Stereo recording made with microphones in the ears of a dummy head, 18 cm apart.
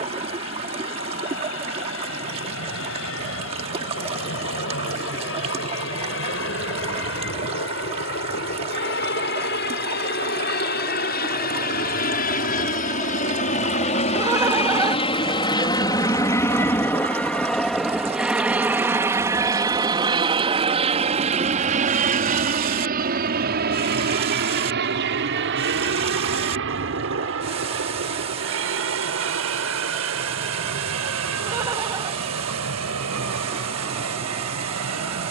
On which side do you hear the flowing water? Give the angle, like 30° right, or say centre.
30° right.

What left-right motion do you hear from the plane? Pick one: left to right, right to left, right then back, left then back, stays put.
left to right.